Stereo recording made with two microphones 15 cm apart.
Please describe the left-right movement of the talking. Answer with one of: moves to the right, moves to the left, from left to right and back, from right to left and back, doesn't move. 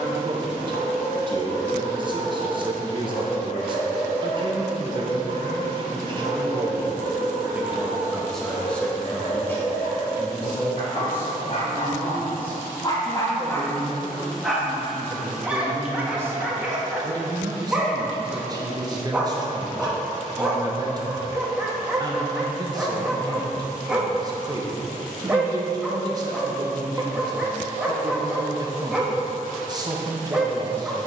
from right to left and back.